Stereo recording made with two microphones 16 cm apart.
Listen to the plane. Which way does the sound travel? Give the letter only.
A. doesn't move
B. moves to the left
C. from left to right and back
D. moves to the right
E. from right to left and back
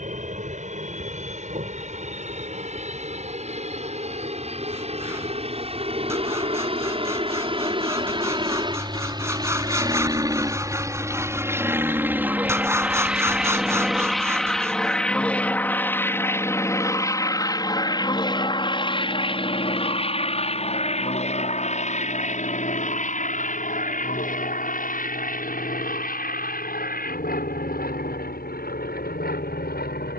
B.